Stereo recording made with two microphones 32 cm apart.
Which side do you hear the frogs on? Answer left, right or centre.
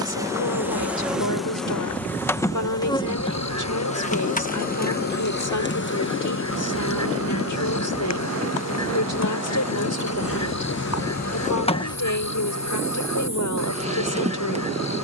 left.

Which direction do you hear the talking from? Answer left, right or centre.
left.